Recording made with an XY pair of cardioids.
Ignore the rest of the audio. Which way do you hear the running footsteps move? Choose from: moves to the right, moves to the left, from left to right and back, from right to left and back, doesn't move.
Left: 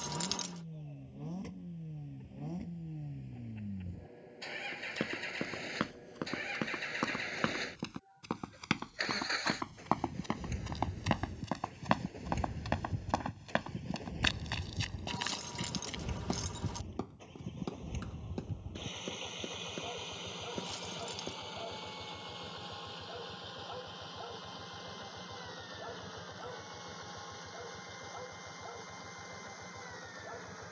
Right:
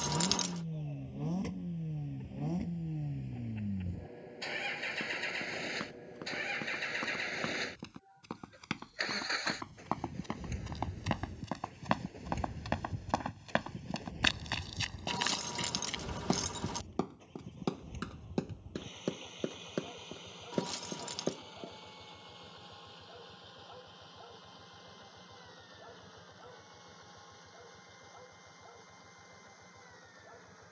moves to the right.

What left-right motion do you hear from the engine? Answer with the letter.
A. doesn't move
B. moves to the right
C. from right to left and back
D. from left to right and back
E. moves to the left
E.